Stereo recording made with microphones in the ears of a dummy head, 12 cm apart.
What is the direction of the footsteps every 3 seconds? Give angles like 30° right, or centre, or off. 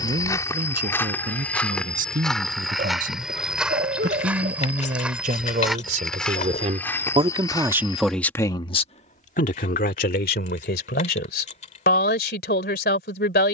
10° left, 10° right, 20° left, off, off.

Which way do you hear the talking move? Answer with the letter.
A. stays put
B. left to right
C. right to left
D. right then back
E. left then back
C.